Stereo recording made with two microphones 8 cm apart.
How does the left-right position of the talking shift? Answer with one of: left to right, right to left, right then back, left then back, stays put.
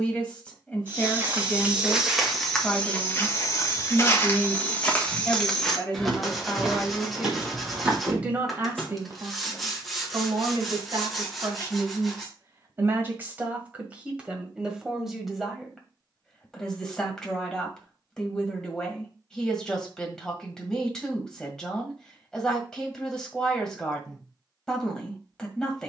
right then back.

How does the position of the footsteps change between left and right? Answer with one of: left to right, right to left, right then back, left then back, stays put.
left then back.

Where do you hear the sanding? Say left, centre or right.
centre.